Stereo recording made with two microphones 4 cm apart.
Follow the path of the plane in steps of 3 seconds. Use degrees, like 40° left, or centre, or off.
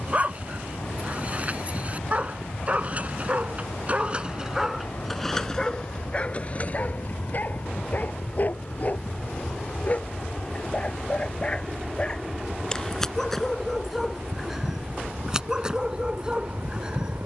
60° left, 50° left, 30° left, 10° left, 20° right, 40° right.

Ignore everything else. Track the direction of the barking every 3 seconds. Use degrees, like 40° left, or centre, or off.
40° right, 10° right, 30° left, 20° left, centre, 20° right.